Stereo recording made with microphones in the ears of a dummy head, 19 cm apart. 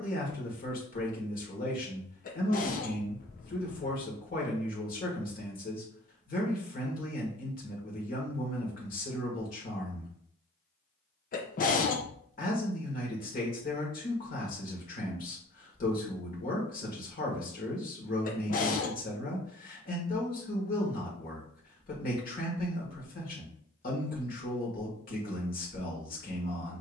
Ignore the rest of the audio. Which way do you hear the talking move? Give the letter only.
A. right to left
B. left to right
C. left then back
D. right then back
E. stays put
E.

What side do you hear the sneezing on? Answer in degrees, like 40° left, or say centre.
40° left.